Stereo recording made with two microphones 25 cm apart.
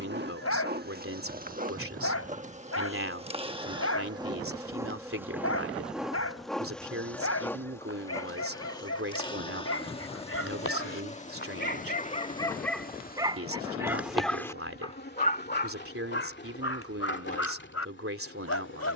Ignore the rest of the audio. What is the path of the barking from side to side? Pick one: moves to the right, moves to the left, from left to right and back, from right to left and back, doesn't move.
from left to right and back.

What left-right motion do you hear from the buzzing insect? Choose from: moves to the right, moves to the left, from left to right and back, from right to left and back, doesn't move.
moves to the left.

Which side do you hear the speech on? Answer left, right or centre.
right.